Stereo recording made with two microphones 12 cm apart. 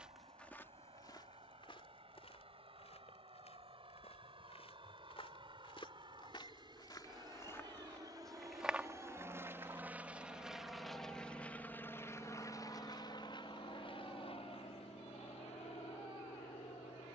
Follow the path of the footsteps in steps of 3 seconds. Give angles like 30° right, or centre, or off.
40° left, 60° left, 20° left, 30° right, off, off.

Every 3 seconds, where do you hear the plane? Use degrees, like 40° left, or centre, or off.
60° right, 60° right, 40° right, centre, 40° left, 60° left.